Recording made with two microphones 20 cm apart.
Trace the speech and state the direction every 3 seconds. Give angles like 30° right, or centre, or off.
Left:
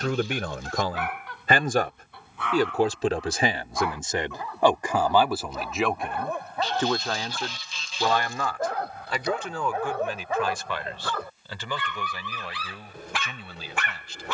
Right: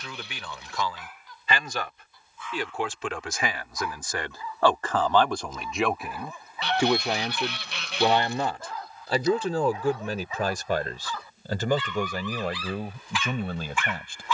50° left, 20° left, 20° right, 40° right, 50° right.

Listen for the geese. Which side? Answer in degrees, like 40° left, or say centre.
70° right.